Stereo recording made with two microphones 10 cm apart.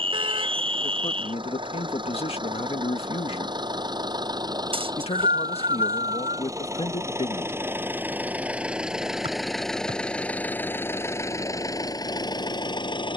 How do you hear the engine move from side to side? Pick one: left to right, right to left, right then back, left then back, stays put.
right to left.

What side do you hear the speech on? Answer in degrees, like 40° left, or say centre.
80° left.